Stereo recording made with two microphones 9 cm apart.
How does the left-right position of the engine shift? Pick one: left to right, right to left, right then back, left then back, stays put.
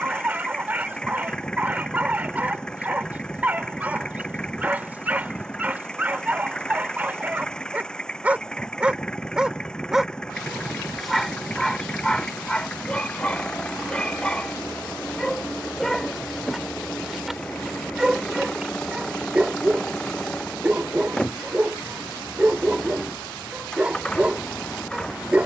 stays put.